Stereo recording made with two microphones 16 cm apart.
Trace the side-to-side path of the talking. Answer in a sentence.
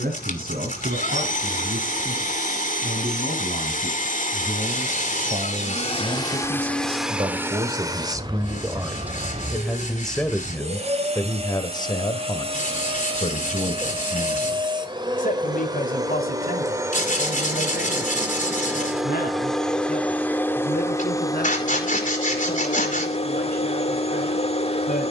You can hear the talking move to the left.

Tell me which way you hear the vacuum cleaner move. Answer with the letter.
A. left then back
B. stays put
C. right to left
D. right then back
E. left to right
D.